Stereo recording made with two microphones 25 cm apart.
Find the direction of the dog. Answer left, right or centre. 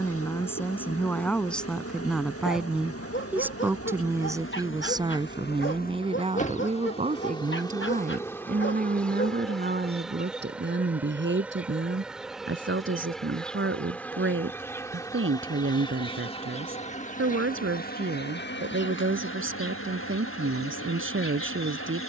left.